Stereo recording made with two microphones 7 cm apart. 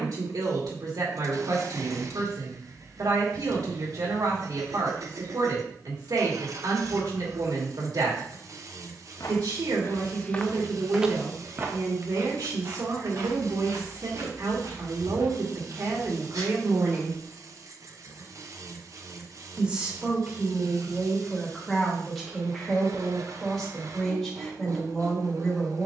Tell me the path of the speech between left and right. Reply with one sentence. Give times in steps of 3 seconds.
In this clip you hear the speech on the right from 0 s and in the centre from 18 s.